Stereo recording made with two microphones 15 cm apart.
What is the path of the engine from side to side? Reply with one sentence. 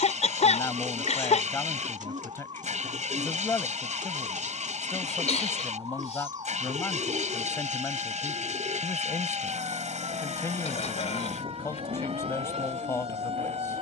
In this clip you hear the engine stay put.